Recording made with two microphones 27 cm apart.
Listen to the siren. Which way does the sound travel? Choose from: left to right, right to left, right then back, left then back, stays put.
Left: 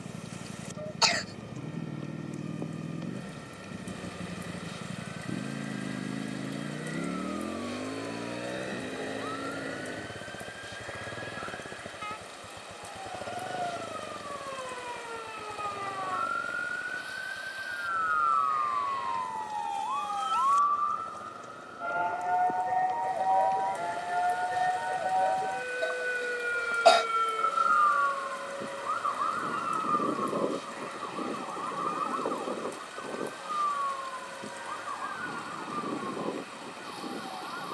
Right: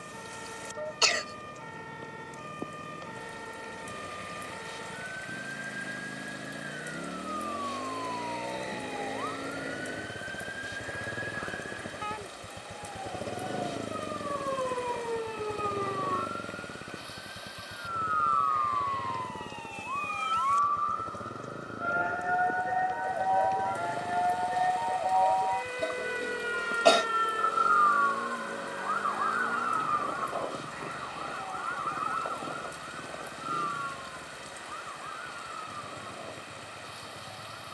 right to left.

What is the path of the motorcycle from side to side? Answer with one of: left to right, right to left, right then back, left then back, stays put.
left to right.